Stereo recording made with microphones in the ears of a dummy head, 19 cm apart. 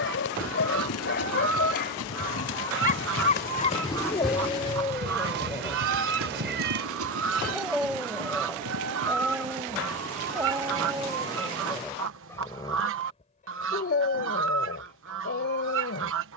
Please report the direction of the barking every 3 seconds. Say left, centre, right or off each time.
left, left, centre, centre, left, left.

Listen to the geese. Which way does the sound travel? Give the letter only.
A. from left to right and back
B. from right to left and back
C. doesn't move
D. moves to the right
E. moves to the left
C.